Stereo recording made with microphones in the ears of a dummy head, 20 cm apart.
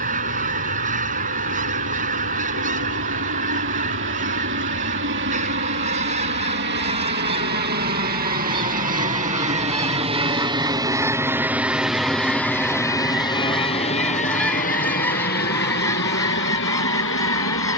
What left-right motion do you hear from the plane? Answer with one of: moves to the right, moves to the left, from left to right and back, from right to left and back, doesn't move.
moves to the left.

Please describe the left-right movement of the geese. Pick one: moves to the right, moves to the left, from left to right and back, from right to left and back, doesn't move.
moves to the left.